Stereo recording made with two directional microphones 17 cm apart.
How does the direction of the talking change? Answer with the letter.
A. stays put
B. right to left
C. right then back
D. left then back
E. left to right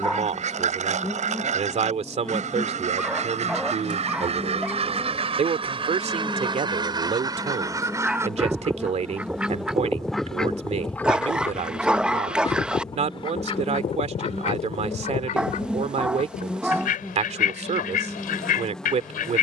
A.